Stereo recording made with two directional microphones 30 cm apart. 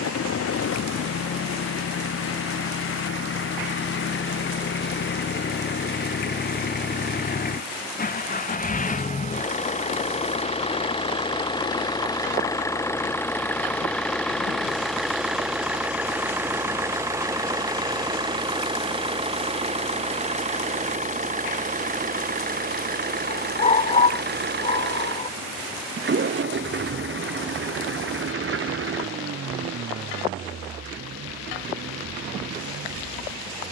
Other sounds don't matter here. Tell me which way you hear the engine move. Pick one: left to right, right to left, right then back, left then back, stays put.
left to right.